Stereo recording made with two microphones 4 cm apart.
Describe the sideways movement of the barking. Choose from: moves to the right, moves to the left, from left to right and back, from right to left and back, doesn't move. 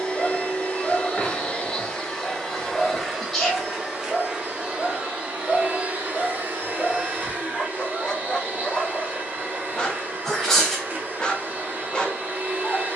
doesn't move.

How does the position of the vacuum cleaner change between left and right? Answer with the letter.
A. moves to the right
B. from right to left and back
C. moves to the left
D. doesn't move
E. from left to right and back
A.